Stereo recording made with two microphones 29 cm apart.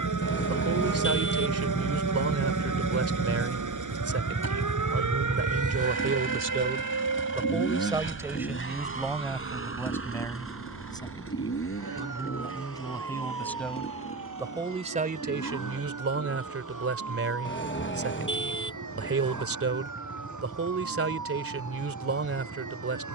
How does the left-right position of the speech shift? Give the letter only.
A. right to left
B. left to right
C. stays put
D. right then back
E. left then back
E.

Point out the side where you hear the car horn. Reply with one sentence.
In this clip you hear the car horn on the left.